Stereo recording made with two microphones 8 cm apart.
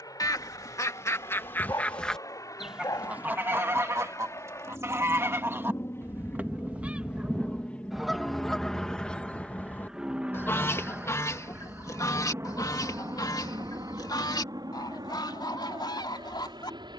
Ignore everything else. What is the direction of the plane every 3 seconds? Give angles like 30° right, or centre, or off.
50° left, 40° left, 20° left, 20° right, 40° right, 60° right.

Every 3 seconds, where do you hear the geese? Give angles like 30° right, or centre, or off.
30° left, 30° right, 10° right, 30° left, 60° left, 70° left.